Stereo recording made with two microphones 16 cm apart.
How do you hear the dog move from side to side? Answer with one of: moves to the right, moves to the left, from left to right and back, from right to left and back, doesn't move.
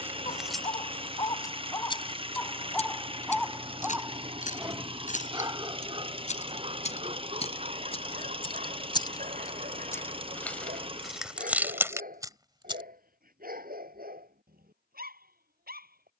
moves to the right.